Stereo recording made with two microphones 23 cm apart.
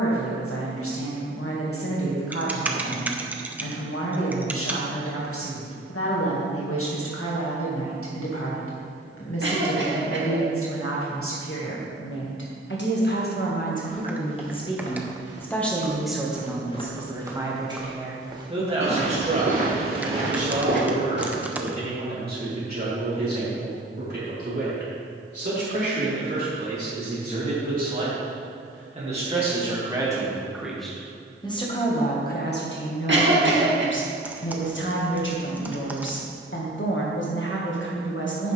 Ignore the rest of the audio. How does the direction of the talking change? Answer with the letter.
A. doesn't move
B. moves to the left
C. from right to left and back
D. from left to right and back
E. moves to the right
D.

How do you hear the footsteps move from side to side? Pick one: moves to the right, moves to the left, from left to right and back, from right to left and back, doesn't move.
moves to the right.